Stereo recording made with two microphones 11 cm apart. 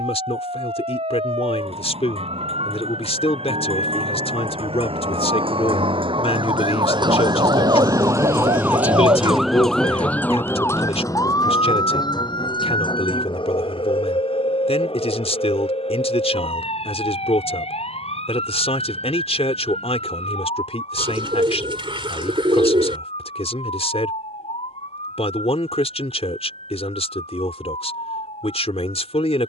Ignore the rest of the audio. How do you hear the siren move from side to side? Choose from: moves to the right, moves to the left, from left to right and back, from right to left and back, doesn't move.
moves to the left.